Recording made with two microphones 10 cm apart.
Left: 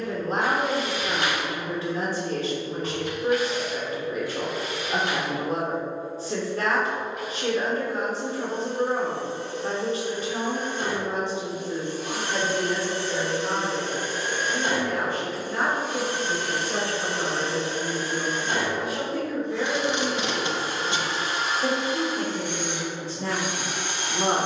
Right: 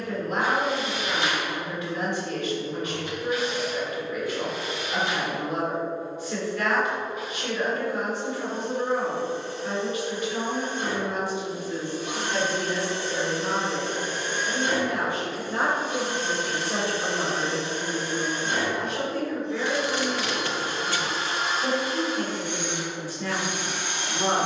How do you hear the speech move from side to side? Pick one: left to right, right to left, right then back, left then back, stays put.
right then back.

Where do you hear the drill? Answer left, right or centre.
left.